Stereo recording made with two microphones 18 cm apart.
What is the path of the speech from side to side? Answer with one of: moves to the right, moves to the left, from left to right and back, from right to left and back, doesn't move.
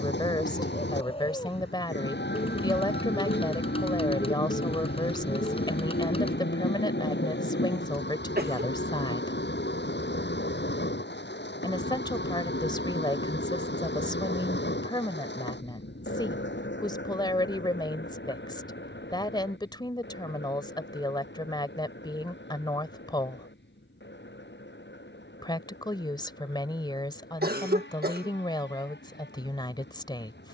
doesn't move.